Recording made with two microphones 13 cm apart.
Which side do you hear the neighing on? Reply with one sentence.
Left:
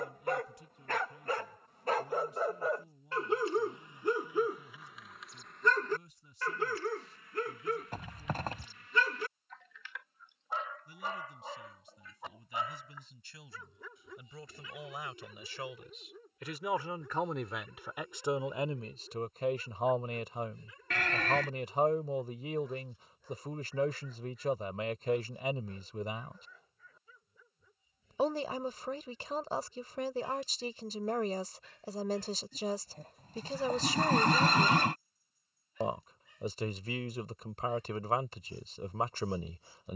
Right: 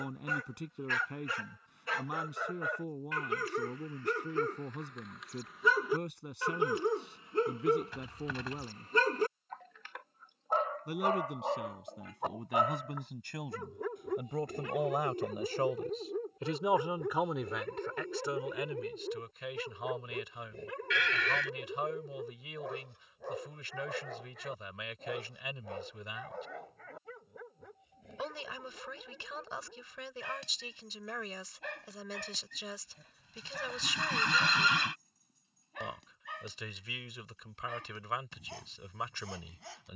In this clip you hear the neighing on the left.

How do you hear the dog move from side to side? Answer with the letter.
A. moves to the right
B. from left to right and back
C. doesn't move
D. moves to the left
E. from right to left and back
A.